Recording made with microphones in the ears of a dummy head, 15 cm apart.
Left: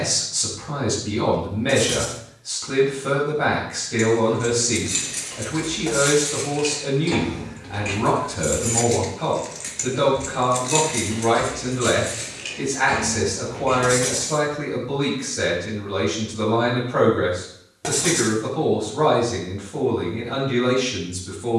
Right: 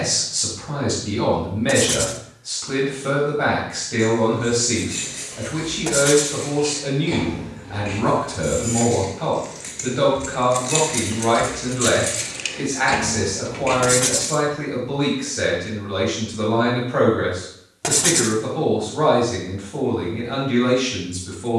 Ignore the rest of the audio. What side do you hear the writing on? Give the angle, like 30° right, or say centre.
30° right.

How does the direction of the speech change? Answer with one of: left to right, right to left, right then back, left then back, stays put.
stays put.